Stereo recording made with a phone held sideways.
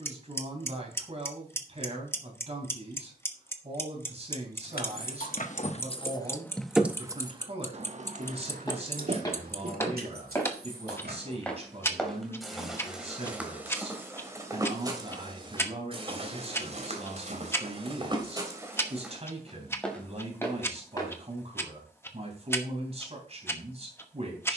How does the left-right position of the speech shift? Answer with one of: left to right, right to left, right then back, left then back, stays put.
stays put.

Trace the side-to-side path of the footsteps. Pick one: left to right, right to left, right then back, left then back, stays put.
right then back.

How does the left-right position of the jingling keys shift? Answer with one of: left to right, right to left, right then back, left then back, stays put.
left to right.